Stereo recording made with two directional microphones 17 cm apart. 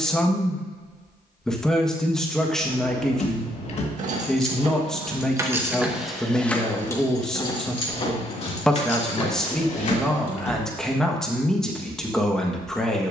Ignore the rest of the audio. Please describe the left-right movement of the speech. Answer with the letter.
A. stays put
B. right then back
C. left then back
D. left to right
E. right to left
A.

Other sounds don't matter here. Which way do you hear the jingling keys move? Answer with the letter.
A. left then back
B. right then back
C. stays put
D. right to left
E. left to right
D.